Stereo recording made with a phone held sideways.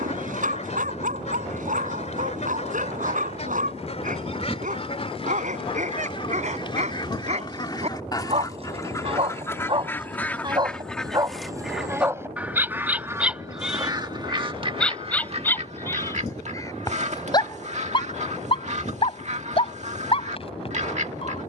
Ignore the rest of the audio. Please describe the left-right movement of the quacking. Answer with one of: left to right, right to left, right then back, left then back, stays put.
left to right.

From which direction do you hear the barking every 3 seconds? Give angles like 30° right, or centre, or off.
50° right, 50° right, 40° right, 30° right, 10° right, 20° left, 40° left.